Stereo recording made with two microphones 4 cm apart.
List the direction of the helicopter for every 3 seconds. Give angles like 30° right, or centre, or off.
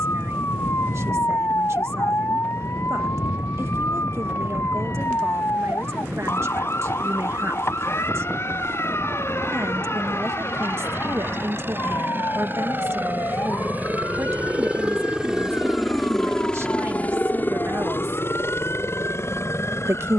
70° right, 70° right, 60° right, 60° right, 40° right, 20° left, 70° left.